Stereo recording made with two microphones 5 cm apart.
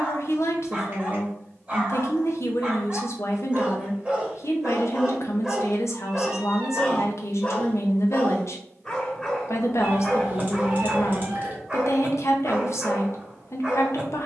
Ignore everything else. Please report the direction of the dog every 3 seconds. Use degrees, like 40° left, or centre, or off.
20° right, 10° right, 20° left, 10° right, 20° right.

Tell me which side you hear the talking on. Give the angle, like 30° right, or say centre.
60° left.